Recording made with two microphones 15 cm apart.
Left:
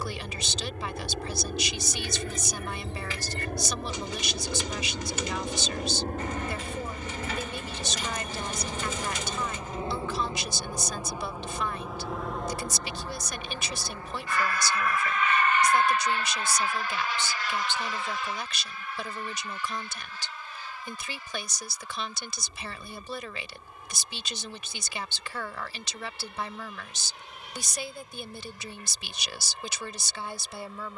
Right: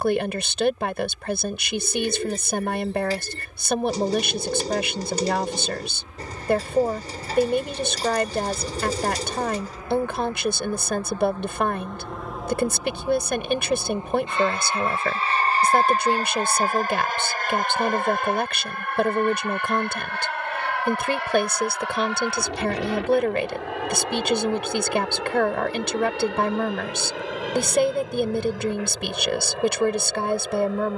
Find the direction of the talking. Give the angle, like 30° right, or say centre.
60° right.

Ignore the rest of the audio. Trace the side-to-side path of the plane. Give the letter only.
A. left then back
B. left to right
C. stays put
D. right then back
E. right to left
B.